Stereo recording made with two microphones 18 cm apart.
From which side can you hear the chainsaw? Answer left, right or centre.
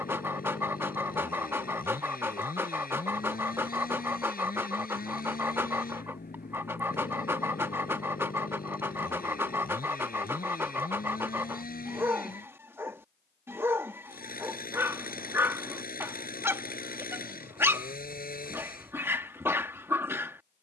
left.